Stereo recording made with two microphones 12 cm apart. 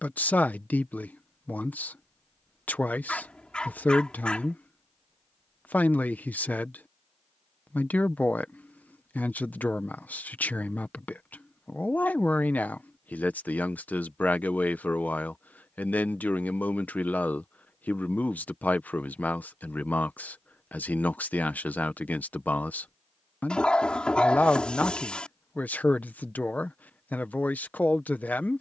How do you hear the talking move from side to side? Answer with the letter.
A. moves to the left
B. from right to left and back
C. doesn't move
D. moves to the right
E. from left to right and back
C.